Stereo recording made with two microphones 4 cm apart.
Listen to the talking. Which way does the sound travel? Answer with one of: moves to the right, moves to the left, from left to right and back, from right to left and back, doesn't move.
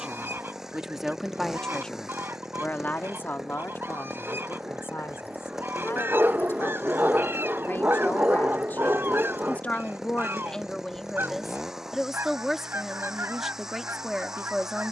from right to left and back.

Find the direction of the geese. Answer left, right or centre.
right.